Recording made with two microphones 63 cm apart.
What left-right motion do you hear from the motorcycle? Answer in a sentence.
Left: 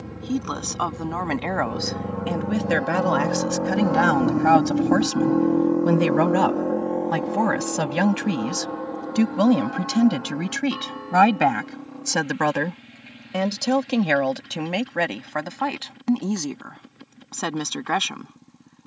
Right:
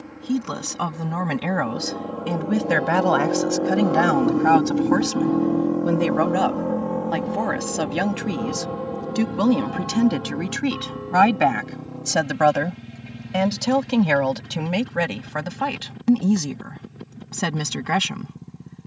You can hear the motorcycle move from left to right.